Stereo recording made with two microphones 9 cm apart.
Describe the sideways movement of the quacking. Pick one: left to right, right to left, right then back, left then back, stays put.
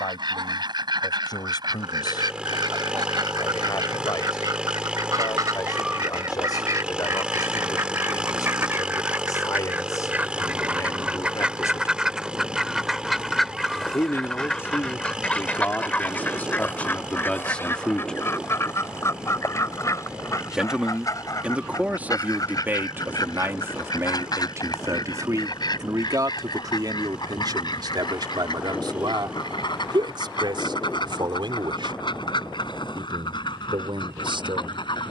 right to left.